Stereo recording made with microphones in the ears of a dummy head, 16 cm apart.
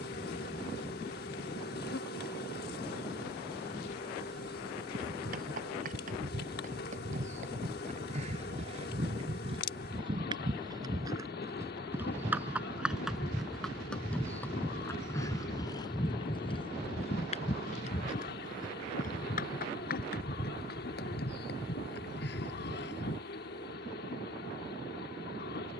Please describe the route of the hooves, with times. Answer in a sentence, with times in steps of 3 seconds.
In this clip you hear the hooves not at all from 0 s, on the right from 3 s, in the centre from 12 s, on the left from 15 s and not at all from 24 s.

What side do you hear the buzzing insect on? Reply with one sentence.
In this clip you hear the buzzing insect on the left.